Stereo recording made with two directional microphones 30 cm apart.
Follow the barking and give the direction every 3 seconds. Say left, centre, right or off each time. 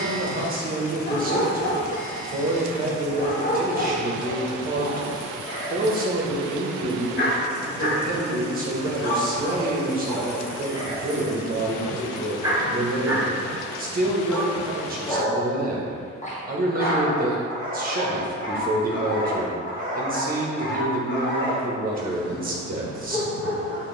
left, left, left, centre, centre, left, left, left.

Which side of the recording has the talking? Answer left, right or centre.
right.